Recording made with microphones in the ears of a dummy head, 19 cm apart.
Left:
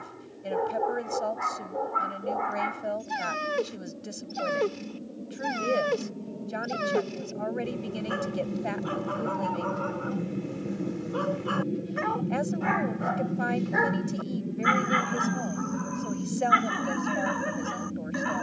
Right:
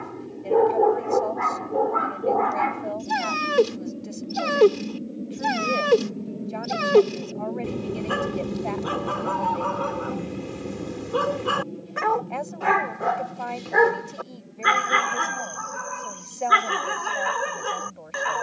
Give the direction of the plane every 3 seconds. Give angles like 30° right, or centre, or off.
50° right, 40° right, 20° right, 10° left, 40° left, 60° left.